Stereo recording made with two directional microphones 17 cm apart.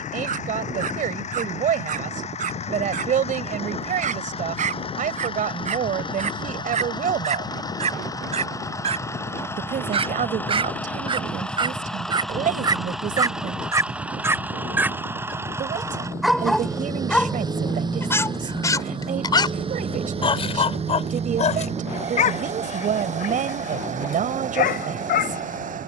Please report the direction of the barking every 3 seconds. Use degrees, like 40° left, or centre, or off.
50° right, 50° right, 40° right, 30° right, 20° right, centre, 30° left, 50° left, 60° left.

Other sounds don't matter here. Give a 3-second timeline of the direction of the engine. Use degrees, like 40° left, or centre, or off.
40° left, 30° left, 20° left, 10° left, centre, 20° right, 30° right, 40° right, 50° right.